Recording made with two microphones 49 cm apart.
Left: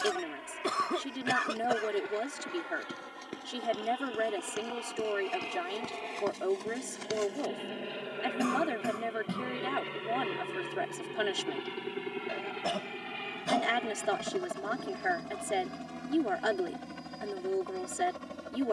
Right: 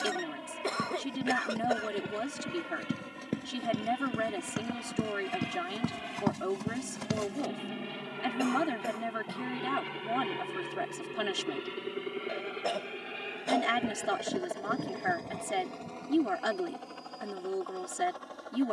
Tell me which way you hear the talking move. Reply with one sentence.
In this clip you hear the talking stay in one place.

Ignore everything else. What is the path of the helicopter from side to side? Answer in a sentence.
You can hear the helicopter move from right to left.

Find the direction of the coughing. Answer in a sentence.
In this clip you hear the coughing on the left.